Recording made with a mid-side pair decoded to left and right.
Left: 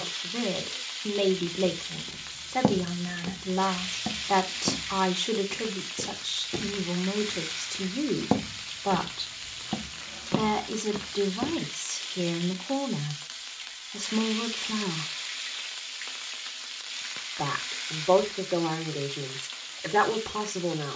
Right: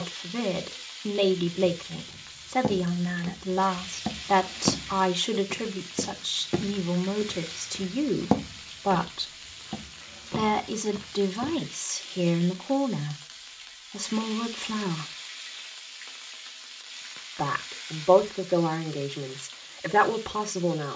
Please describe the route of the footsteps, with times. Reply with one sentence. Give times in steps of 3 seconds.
You can hear the footsteps on the left from 0 s, on the right from 3 s, on the left from 9 s and not at all from 12 s.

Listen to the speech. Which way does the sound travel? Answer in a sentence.
In this clip you hear the speech stay put.